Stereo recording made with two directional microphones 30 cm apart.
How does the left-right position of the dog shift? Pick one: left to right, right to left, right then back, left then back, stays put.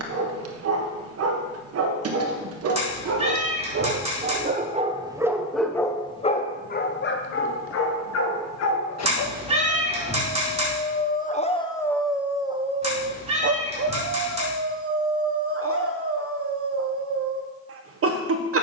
left then back.